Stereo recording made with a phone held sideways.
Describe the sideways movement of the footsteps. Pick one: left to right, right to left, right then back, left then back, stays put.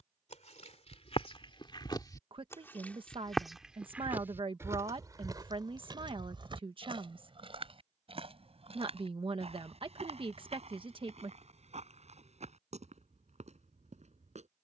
left to right.